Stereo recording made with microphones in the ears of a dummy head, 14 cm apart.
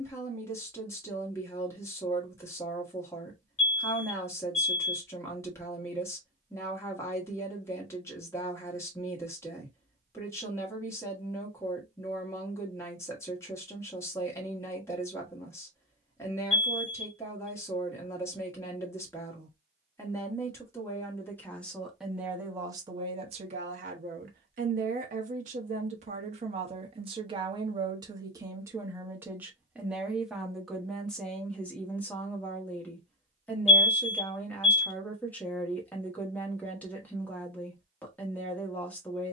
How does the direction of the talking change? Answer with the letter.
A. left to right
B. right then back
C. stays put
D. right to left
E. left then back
B.